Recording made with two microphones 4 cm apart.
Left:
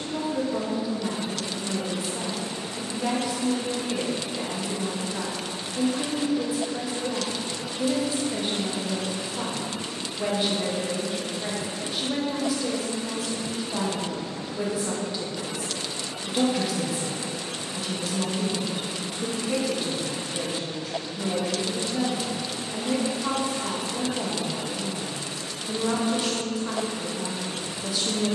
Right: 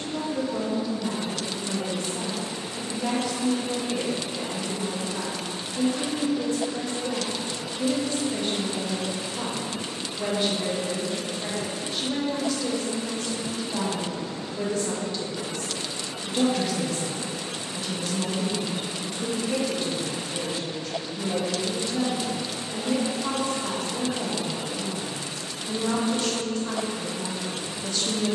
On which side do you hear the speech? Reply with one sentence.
In this clip you hear the speech in the centre.